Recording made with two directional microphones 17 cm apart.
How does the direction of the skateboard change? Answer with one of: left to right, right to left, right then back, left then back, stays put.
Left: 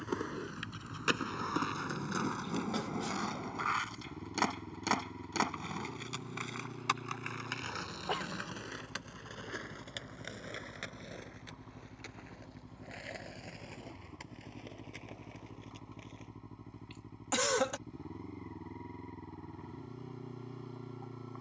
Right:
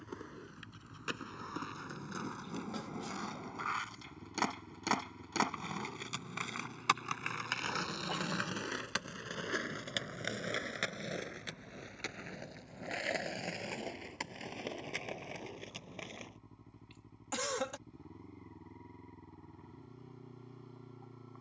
left to right.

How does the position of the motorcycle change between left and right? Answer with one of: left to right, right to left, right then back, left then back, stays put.
stays put.